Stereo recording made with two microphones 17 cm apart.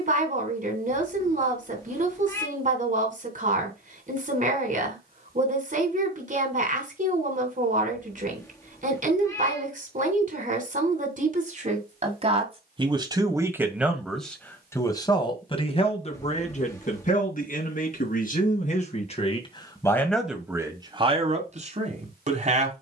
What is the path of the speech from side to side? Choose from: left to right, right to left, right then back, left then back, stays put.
left then back.